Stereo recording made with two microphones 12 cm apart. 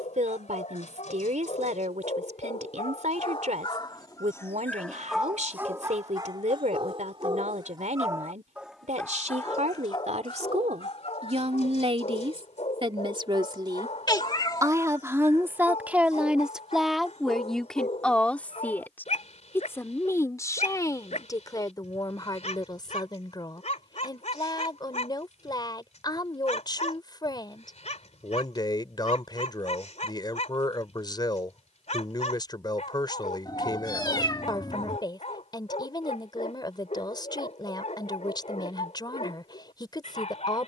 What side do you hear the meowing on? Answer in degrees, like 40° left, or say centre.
30° left.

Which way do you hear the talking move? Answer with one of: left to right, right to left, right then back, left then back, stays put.
right to left.